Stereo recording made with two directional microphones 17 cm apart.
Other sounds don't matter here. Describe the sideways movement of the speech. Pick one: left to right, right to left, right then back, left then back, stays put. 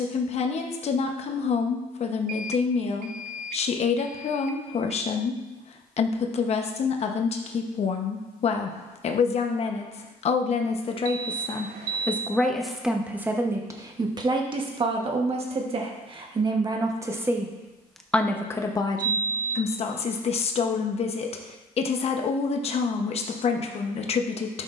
right then back.